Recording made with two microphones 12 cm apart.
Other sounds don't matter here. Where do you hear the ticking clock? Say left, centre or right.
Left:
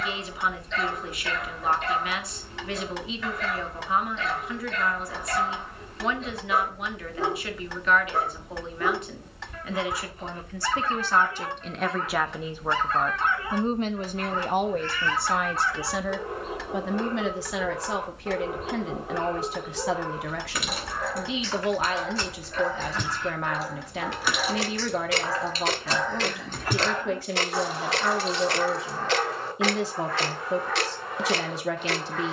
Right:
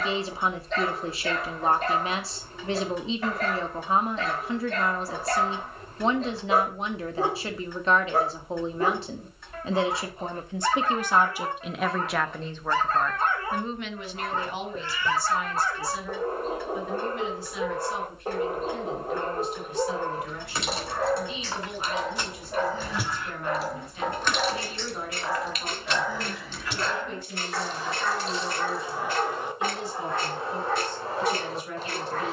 left.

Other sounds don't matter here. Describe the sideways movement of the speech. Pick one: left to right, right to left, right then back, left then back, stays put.
right to left.